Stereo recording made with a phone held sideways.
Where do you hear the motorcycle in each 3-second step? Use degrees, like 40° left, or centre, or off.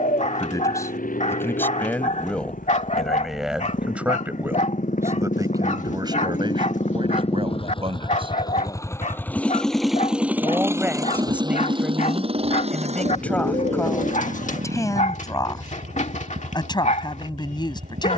70° left, 60° left, 40° left, 10° right, 50° right, 70° right.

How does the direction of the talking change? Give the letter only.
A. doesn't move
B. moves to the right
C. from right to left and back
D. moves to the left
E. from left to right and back
E.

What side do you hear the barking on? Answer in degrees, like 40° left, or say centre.
60° left.